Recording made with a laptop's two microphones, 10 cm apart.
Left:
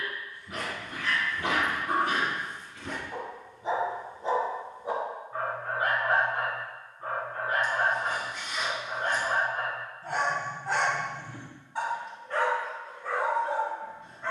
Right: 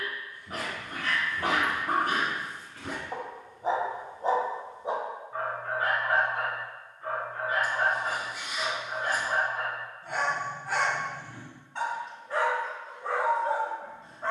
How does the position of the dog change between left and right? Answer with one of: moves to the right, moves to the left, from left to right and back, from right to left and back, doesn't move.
from right to left and back.